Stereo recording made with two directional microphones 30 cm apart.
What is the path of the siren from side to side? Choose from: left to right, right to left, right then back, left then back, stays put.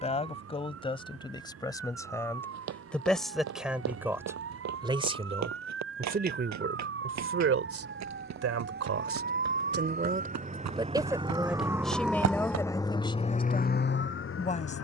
right to left.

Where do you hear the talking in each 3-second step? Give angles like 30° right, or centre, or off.
10° left, 10° right, 40° right, 20° right, 20° left.